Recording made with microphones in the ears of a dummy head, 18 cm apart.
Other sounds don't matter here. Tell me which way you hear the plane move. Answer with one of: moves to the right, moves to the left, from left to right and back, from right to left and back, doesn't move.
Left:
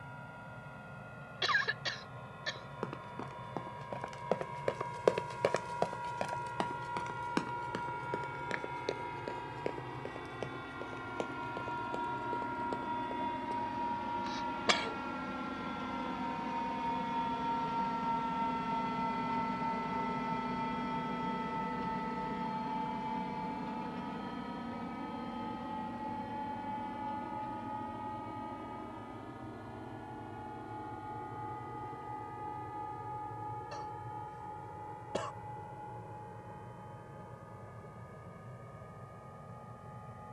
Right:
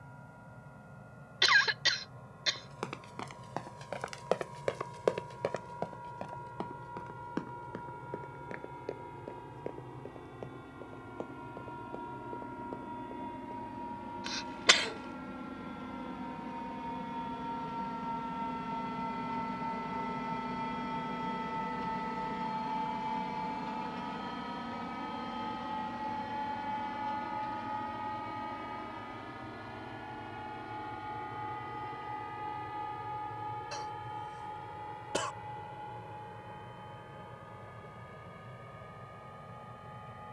moves to the right.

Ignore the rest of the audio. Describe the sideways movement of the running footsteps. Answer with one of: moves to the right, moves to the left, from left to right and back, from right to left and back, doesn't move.
moves to the left.